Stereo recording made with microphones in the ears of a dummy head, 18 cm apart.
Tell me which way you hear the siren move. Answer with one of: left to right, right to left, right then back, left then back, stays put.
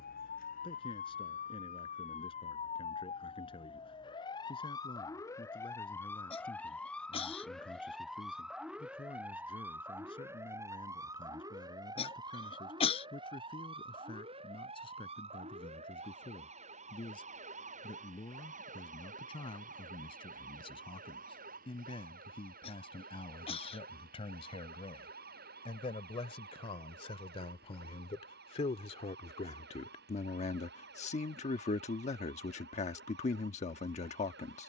left to right.